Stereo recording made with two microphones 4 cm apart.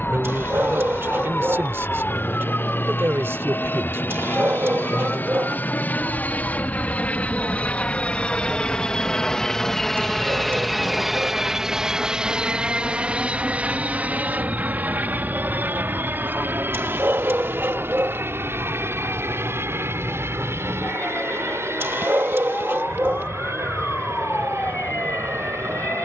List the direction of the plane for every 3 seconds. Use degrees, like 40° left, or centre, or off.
60° left, 50° left, 30° left, centre, 30° right, 50° right, 60° right, 70° right, 70° right.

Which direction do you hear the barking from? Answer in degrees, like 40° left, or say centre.
60° right.